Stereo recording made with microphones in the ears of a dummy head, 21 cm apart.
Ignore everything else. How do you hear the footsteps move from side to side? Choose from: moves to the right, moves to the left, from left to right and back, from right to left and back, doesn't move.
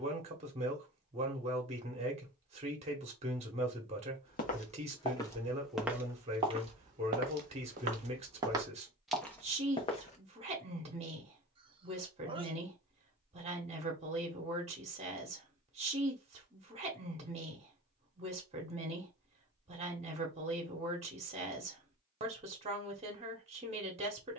from left to right and back.